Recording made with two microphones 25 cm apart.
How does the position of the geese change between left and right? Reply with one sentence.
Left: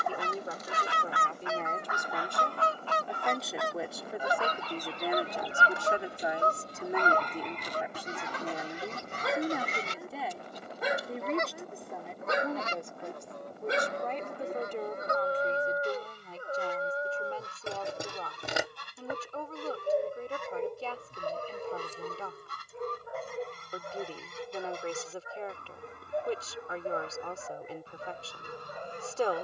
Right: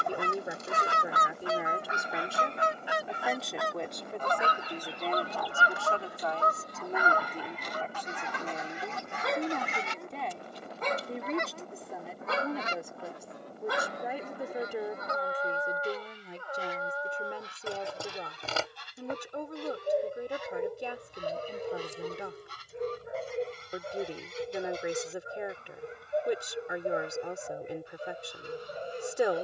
In this clip you hear the geese travel towards the left.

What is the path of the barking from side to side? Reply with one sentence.
In this clip you hear the barking move from right to left and back again.